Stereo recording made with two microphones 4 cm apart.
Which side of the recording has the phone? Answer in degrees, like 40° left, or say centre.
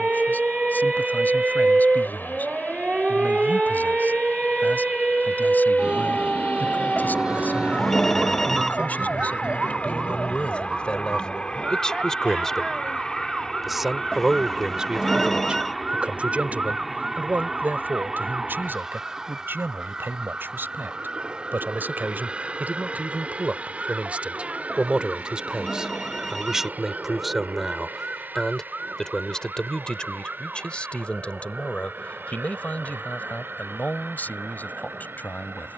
10° left.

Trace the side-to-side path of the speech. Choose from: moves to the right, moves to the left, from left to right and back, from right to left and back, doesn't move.
from left to right and back.